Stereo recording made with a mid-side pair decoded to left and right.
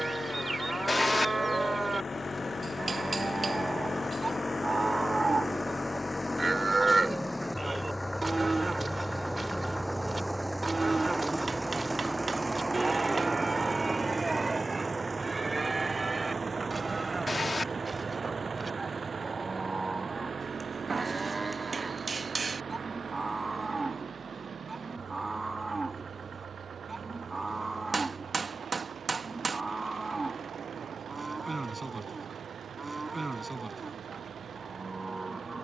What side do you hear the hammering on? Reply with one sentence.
In this clip you hear the hammering on the right.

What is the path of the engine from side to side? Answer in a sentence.
You can hear the engine move to the right.